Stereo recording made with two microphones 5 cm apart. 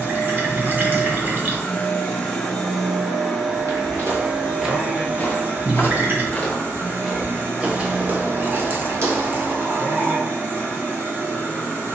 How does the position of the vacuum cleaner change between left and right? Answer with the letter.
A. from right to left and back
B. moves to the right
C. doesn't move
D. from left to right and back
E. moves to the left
B.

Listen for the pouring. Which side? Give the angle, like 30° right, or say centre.
40° right.